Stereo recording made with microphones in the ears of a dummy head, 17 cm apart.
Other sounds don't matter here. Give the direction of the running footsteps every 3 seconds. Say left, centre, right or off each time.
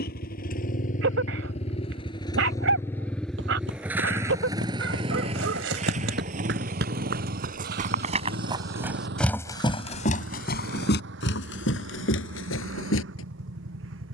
off, right, right, left, left.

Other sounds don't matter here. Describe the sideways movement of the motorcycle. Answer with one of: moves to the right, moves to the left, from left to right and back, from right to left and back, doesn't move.
moves to the right.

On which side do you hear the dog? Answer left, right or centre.
right.